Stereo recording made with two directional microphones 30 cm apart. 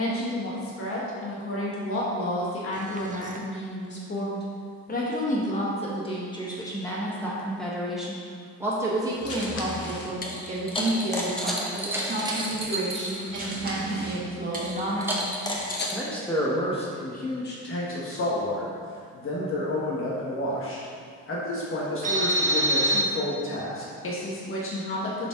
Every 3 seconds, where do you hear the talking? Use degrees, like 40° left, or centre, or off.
50° left, 30° left, 10° left, 20° right, 30° right, 20° left, 40° left, 40° left, 40° left.